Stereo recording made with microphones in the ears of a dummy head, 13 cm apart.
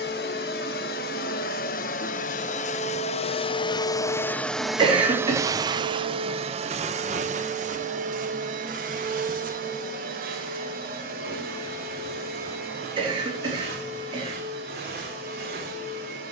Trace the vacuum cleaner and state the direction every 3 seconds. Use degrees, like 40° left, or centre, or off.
60° left, 10° left, 50° right, 70° right, 70° right, 80° right.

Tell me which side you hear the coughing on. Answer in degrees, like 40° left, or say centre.
40° right.